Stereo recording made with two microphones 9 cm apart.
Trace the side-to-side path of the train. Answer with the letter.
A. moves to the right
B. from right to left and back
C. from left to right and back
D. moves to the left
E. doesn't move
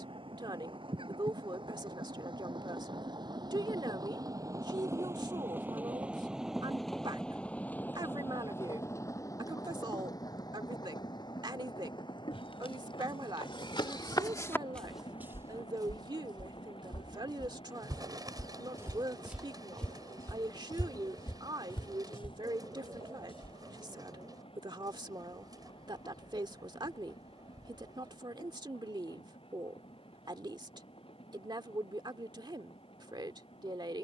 D.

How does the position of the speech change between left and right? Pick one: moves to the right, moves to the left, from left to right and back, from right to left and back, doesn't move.
doesn't move.